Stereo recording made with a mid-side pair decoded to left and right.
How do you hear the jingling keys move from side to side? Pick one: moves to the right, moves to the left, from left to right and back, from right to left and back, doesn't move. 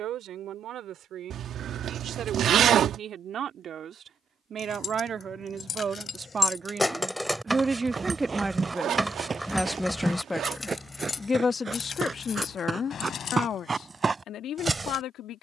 from left to right and back.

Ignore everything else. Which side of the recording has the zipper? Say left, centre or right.
right.